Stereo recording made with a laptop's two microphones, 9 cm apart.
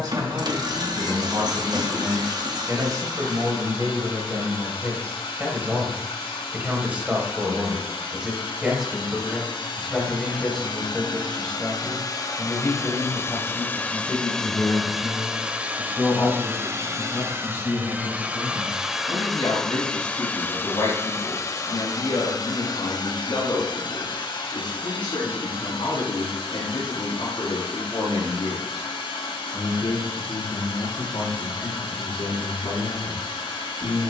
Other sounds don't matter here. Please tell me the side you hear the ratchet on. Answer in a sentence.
In this clip you hear the ratchet on the right.